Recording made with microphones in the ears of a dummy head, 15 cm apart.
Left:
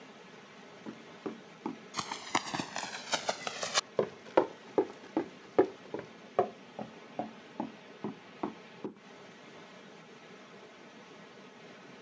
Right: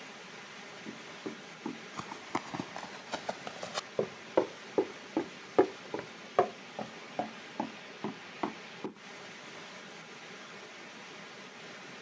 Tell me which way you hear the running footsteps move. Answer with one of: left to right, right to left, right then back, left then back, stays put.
left to right.